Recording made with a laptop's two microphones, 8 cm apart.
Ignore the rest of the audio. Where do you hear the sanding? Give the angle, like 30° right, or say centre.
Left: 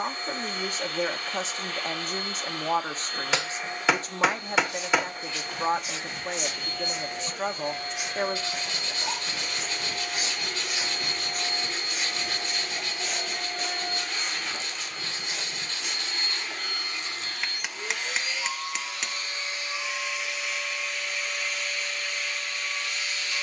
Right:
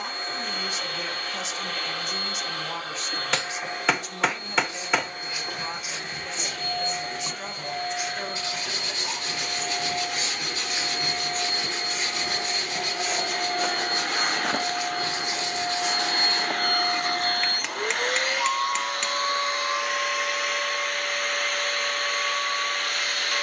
20° right.